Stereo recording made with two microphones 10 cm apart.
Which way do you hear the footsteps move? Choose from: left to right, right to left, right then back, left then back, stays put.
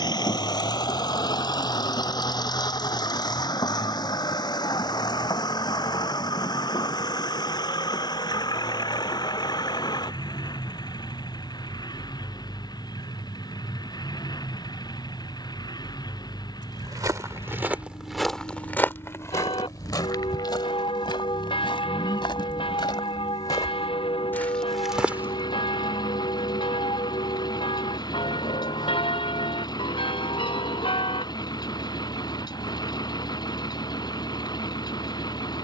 left then back.